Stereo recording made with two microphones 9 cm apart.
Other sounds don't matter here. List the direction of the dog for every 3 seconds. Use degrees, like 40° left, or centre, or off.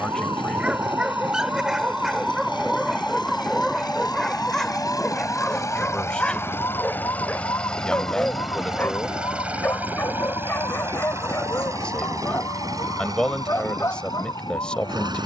10° right, 10° left, 20° left, 30° left, 30° left.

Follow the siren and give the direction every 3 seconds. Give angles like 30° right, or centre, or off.
20° right, 20° left, 40° left, 50° left, 50° left.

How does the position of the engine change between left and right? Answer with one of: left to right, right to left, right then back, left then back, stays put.
left to right.